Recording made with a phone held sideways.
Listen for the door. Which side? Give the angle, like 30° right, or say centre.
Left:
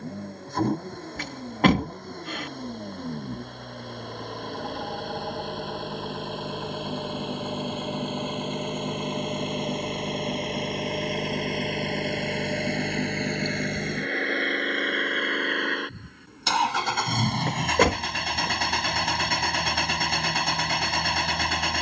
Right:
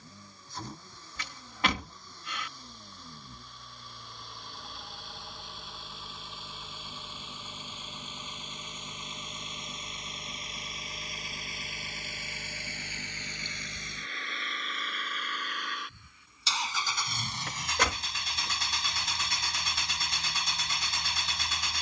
50° left.